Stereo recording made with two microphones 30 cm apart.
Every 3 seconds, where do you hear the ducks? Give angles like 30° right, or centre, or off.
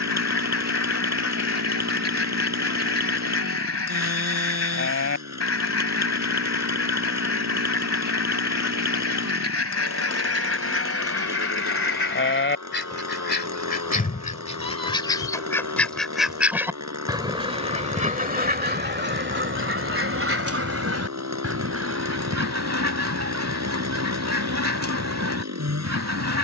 50° left, 50° left, 50° left, 50° left, 30° left, 10° right, 40° right, 60° right, 60° right.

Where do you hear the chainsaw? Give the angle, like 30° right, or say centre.
60° right.